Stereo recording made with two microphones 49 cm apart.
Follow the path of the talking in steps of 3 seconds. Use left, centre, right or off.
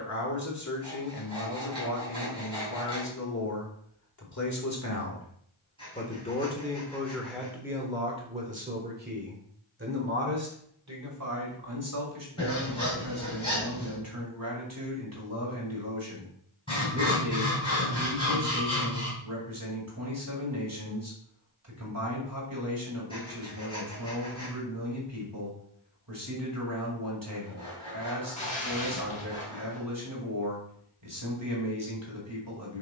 left, left, centre, right, right, right, right, right, right, right, right.